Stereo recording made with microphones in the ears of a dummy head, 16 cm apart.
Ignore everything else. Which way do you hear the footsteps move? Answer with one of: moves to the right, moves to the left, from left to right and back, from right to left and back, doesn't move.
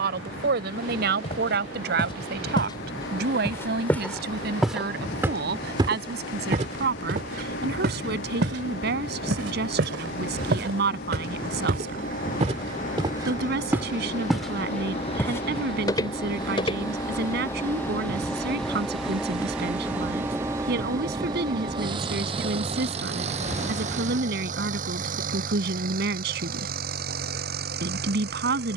from left to right and back.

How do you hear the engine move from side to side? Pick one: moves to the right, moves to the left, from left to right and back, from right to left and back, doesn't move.
moves to the right.